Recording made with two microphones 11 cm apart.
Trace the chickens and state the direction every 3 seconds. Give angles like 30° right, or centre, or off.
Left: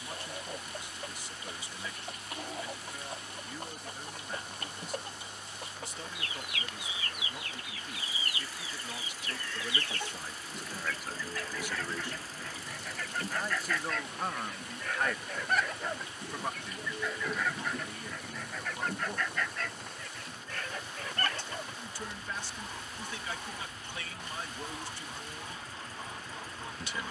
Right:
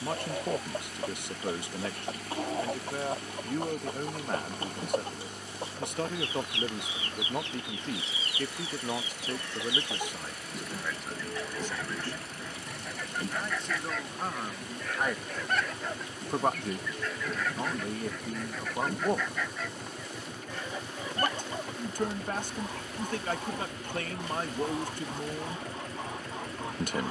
30° right, 30° right, 30° right, 20° right, 10° right, centre, 10° right, 20° right, 30° right.